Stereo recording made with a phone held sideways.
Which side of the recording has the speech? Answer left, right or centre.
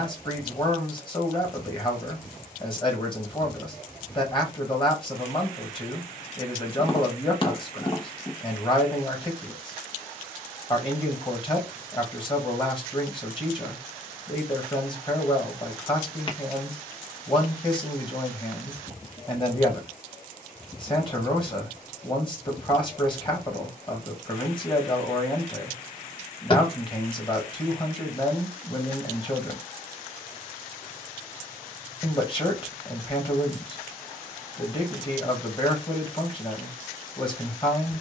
left.